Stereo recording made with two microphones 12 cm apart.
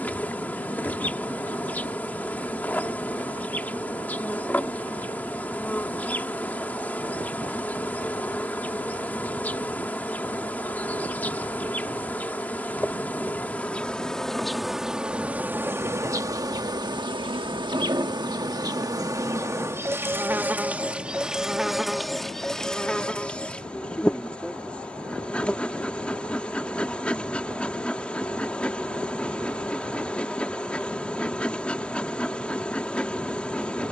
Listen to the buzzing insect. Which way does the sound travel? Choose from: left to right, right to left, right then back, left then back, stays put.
right then back.